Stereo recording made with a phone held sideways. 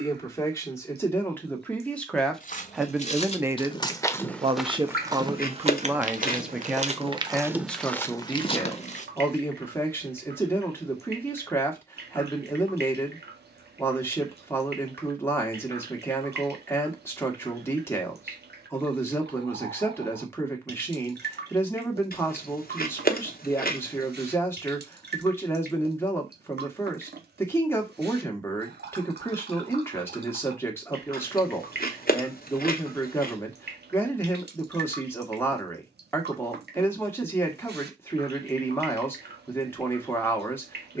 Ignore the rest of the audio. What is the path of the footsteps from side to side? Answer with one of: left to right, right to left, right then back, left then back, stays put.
right then back.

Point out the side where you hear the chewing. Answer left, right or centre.
left.